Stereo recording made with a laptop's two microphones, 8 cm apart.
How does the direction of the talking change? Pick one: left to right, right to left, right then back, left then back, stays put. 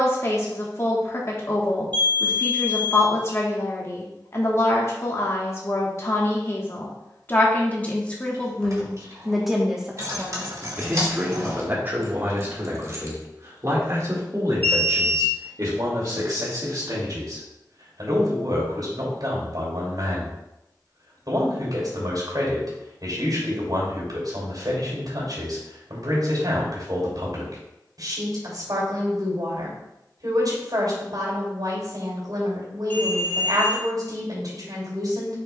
left to right.